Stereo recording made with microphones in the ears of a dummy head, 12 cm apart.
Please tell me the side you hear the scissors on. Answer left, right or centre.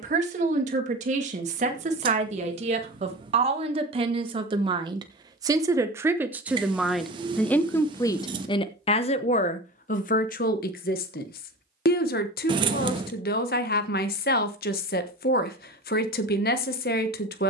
right.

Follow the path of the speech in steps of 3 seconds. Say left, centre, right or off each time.
right, right, centre, left, left, left.